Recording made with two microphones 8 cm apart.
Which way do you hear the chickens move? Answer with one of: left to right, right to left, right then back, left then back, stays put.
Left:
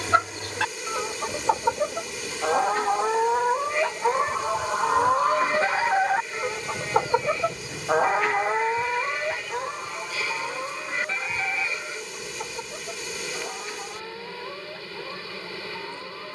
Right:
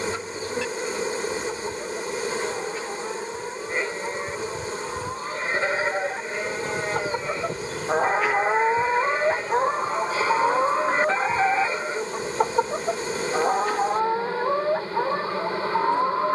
left to right.